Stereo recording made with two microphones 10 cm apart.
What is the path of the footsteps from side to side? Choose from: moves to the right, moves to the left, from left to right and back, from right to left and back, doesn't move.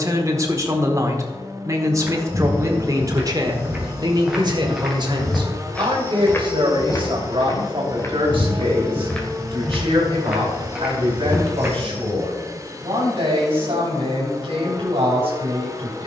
from right to left and back.